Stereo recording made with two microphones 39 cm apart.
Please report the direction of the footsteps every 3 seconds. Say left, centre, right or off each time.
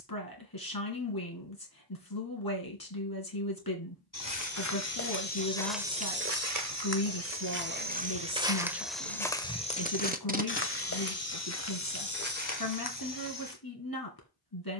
off, left, right, left, left.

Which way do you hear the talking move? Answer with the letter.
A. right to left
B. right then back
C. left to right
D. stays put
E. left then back
D.